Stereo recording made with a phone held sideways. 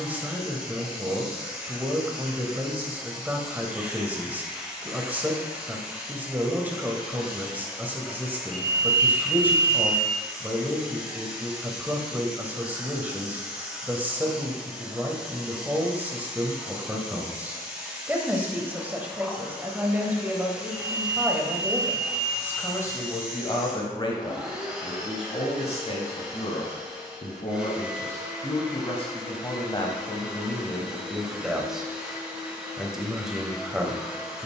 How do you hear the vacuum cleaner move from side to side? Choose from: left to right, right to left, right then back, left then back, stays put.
stays put.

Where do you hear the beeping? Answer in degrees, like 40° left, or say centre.
50° left.